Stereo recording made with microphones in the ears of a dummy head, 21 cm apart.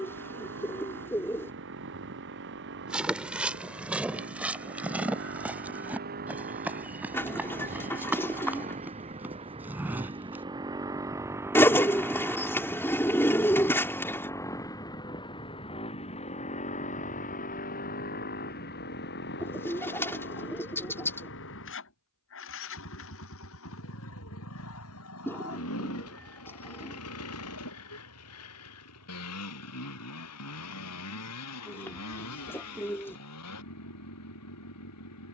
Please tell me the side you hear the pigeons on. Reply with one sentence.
In this clip you hear the pigeons in the centre.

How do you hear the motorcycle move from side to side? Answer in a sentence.
In this clip you hear the motorcycle move to the left.